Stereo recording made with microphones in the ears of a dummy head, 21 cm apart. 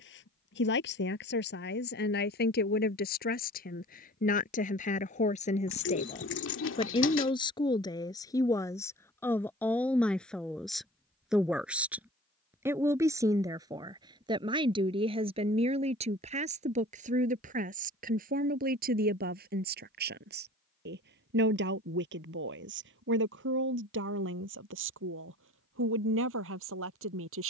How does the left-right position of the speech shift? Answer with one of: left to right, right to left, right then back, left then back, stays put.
left to right.